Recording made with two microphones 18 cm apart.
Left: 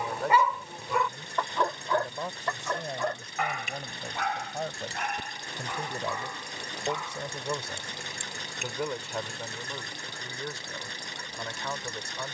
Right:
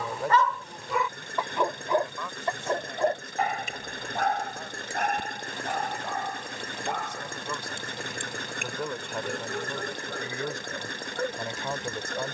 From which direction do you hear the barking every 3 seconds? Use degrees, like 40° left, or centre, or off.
10° right, 40° right, 60° right, 60° right.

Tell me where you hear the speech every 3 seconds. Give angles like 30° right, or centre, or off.
20° left, 50° left, 20° left, 10° right.